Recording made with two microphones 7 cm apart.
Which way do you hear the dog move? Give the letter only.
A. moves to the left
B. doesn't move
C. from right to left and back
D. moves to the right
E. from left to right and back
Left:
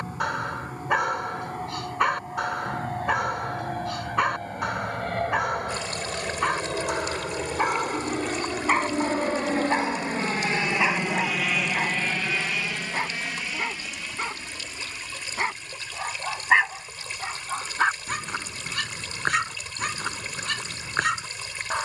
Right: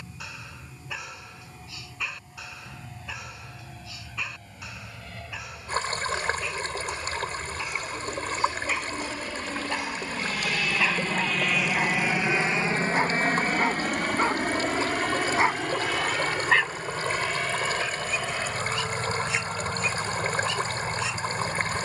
E.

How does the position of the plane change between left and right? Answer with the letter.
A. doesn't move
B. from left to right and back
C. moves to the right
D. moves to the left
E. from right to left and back
C.